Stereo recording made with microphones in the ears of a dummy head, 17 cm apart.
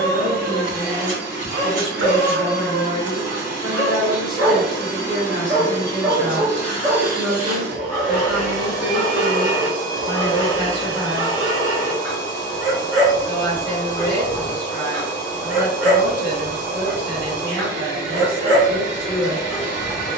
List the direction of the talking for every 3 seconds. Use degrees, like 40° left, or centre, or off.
30° right, centre, 10° right, 30° right, 30° right, 30° right, 30° right.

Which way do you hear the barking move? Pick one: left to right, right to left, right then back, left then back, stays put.
stays put.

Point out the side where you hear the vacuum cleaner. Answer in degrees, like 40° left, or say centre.
40° right.